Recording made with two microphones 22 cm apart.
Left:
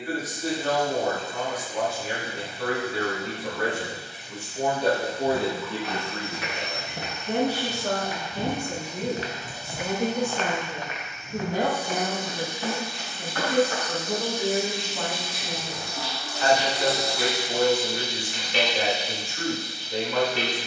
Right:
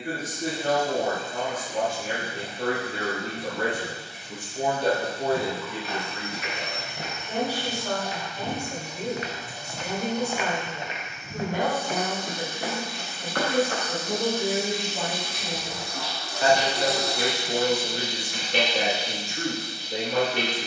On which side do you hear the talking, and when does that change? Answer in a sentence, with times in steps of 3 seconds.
You can hear the talking on the right from 0 s, in the centre from 3 s, on the left from 6 s, in the centre from 12 s and on the right from 15 s.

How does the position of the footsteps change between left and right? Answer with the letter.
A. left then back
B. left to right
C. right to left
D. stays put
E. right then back
B.